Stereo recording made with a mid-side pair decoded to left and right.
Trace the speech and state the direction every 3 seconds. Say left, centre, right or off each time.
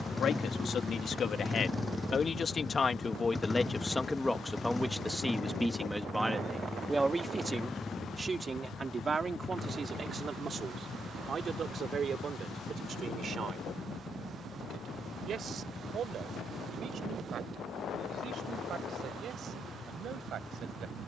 left, centre, right, right, right, right, right.